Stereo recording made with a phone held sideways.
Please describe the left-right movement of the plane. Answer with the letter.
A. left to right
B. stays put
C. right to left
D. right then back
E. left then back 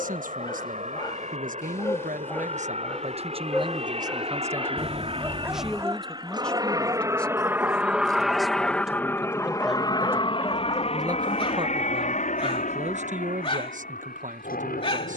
C.